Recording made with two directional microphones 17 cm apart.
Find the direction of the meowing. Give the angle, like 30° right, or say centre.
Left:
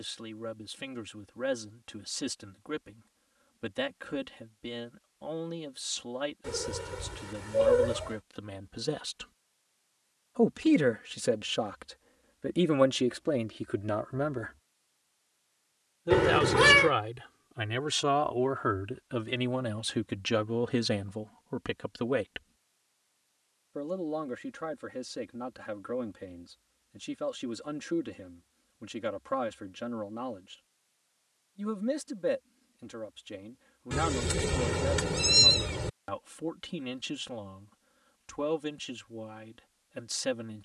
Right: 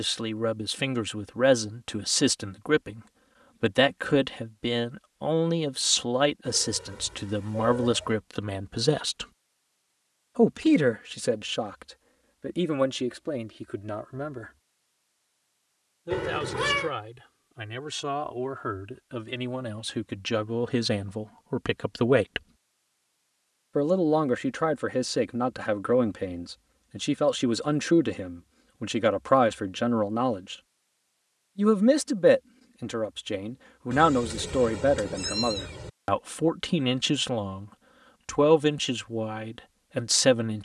40° left.